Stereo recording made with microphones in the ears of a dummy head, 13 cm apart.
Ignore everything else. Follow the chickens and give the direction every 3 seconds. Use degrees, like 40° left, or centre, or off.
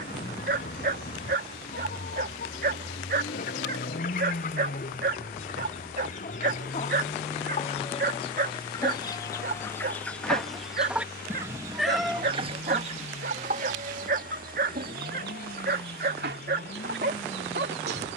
60° left, 60° left, 40° left, centre, 50° right, 70° right.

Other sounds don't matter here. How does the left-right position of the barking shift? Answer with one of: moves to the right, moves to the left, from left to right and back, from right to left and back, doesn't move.
doesn't move.